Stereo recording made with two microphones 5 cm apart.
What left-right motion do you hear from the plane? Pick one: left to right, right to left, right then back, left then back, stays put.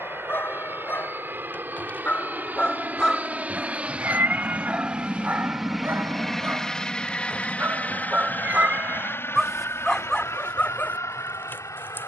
right to left.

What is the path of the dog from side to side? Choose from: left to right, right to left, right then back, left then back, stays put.
right then back.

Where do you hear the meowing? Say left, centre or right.
right.